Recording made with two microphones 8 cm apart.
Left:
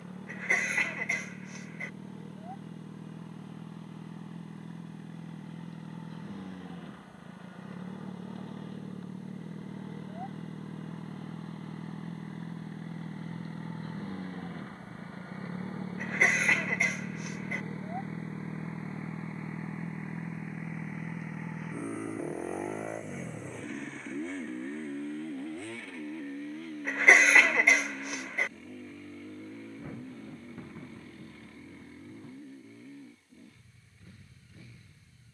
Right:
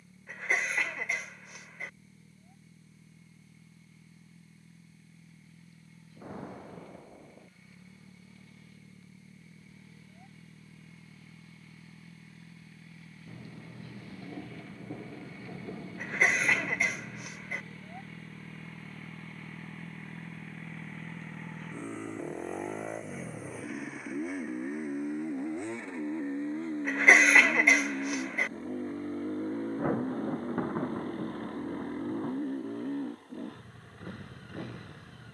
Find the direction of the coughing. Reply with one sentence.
You can hear the coughing in the centre.